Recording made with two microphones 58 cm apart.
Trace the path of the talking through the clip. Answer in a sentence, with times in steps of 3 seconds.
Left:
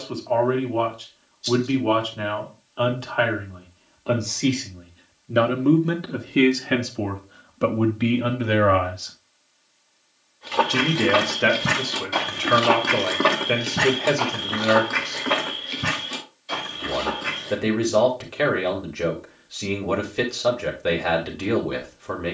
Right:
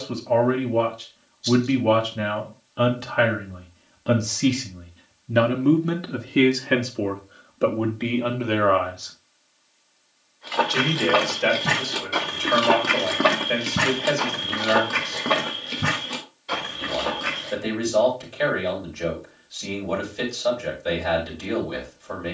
You can hear the talking on the right from 0 s and on the left from 6 s.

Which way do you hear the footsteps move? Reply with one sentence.
You can hear the footsteps travel towards the right.